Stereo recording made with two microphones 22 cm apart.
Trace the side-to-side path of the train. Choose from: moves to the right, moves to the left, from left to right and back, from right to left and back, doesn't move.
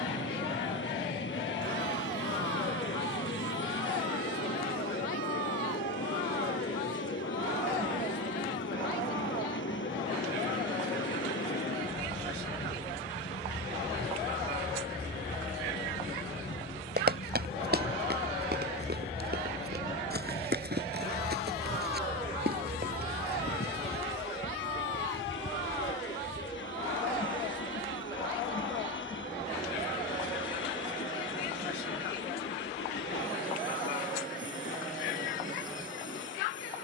doesn't move.